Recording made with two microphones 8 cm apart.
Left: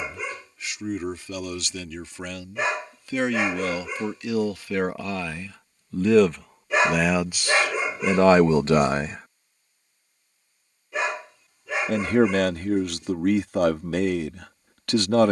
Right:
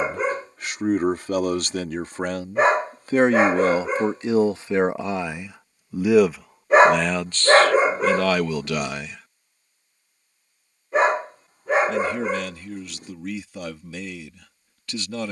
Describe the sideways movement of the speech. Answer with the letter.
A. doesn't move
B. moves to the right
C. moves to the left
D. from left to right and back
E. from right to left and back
C.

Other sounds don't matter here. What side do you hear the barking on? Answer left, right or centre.
right.